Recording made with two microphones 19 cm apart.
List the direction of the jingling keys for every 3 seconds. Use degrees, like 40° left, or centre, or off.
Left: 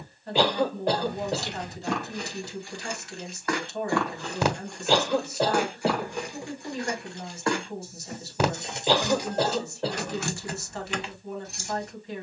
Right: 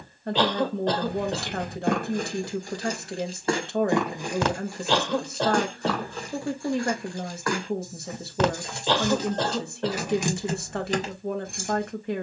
50° right, 10° right, 20° left, 20° right.